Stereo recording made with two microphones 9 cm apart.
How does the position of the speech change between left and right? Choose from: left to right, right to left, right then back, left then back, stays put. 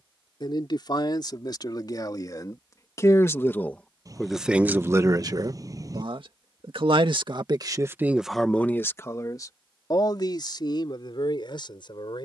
right then back.